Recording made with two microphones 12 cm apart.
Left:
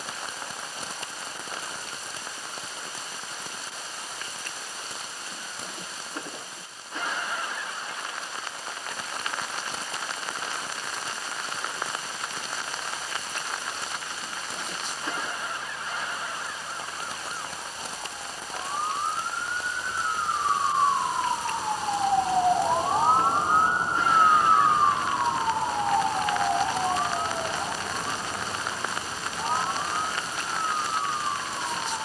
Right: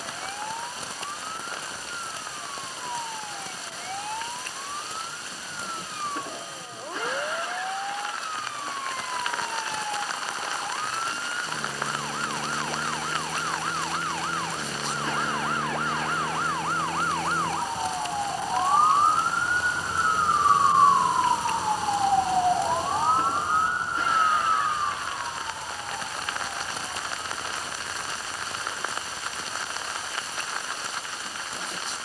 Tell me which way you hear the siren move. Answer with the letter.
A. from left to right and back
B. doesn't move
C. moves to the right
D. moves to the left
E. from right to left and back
D.